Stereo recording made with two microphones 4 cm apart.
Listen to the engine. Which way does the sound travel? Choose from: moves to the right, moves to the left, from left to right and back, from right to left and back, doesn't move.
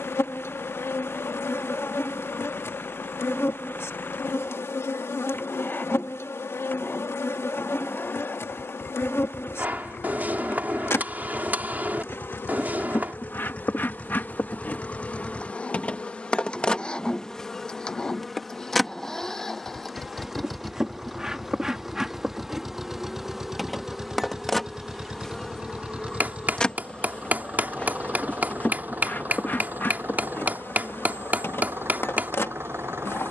moves to the right.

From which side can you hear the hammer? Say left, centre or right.
right.